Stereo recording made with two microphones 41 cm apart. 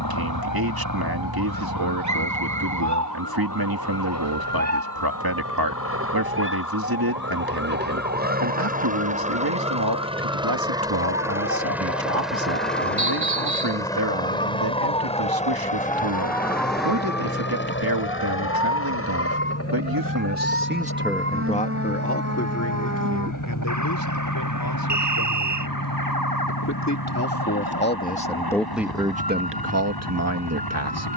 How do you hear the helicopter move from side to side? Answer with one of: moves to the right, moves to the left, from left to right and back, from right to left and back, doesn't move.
moves to the left.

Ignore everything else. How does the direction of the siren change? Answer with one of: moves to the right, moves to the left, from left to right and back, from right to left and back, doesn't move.
moves to the right.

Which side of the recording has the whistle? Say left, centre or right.
right.